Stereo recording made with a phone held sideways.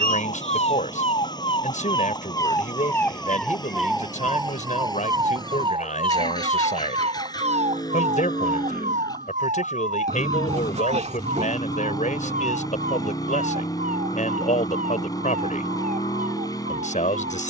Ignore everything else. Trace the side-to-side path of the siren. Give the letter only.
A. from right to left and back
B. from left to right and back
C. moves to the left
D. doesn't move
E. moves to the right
E.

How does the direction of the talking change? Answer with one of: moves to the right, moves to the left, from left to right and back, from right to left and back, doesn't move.
doesn't move.